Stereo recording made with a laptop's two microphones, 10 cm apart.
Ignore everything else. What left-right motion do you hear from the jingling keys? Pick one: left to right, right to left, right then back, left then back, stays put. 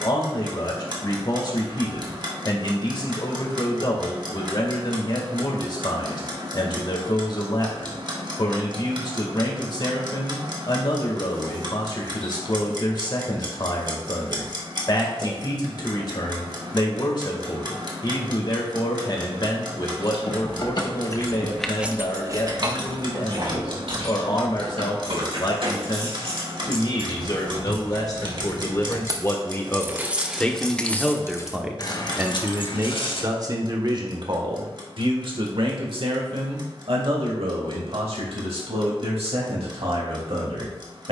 right then back.